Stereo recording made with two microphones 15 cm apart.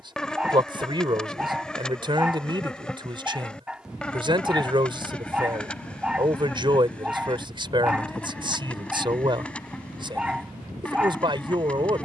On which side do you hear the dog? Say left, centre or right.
centre.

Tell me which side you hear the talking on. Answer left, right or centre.
right.